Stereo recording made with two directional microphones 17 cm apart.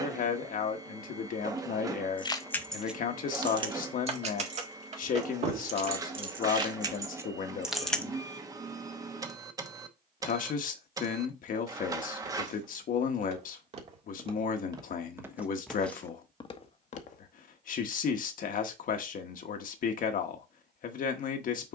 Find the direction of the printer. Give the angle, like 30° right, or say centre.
20° right.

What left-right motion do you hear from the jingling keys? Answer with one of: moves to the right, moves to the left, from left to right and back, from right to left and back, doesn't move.
from left to right and back.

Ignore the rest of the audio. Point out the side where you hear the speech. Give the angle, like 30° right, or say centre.
50° left.